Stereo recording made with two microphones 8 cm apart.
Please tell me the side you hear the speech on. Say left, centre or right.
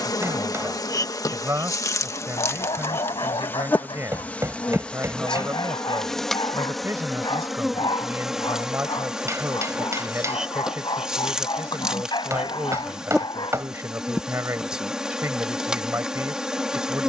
right.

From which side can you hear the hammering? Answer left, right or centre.
right.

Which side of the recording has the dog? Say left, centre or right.
left.